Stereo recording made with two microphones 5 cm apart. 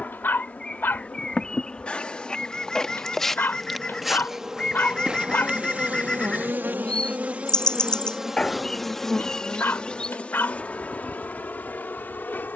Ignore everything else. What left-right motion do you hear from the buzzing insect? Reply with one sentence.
You can hear the buzzing insect move from left to right and back again.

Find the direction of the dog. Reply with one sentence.
You can hear the dog on the left.